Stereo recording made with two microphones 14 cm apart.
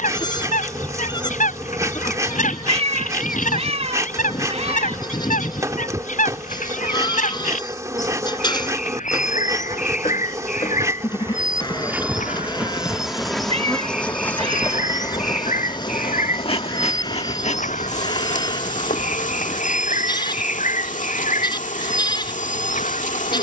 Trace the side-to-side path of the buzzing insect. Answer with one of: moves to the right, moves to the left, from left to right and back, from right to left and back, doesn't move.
moves to the left.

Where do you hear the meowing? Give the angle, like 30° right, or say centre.
50° right.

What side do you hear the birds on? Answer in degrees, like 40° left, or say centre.
70° left.